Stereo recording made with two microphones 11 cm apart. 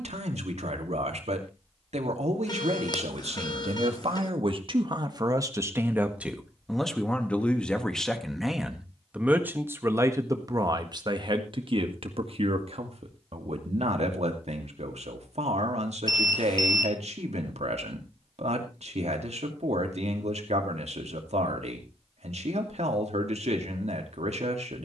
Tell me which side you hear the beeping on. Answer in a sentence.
In this clip you hear the beeping on the left.